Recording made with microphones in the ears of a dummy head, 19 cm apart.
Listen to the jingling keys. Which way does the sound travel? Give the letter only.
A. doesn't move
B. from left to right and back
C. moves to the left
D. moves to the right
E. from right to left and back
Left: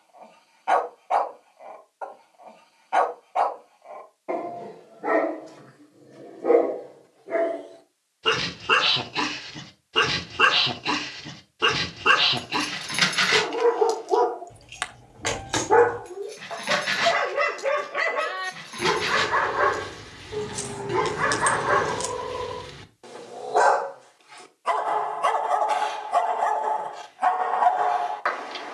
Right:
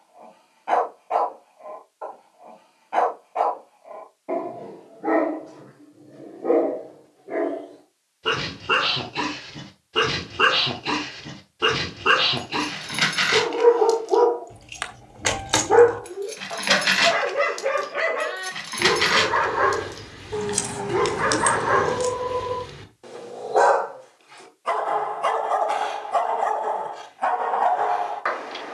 B.